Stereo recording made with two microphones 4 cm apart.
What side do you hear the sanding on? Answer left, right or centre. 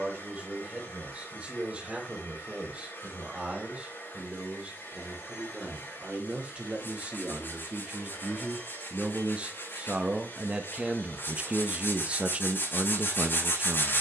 left.